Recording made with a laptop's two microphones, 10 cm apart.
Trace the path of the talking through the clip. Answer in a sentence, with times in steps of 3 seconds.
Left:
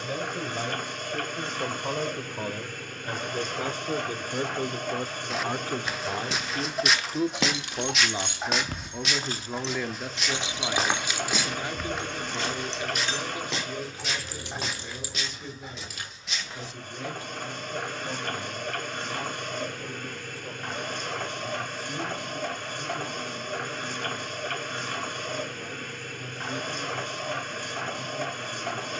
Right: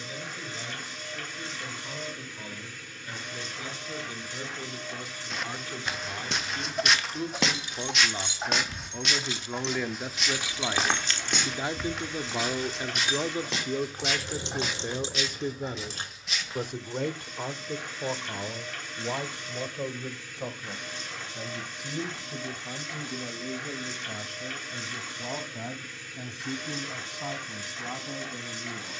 You can hear the talking on the left from 0 s, in the centre from 9 s and on the right from 12 s.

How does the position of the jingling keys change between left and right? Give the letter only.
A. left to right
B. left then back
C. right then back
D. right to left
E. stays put
A.